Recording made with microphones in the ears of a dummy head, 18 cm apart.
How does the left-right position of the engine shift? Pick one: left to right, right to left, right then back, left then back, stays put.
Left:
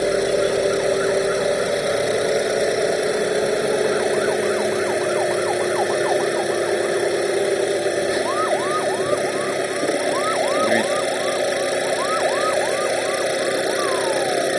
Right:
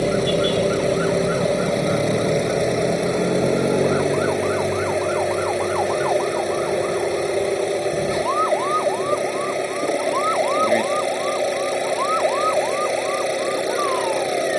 stays put.